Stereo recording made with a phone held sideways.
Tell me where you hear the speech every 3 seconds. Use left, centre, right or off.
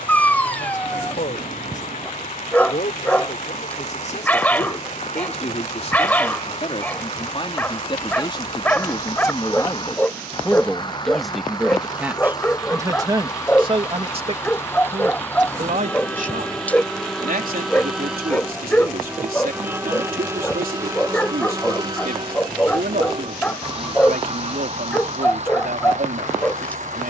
left, left, left, centre, right, right, right, right, right.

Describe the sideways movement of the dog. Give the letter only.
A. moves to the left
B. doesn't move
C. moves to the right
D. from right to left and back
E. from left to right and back
B.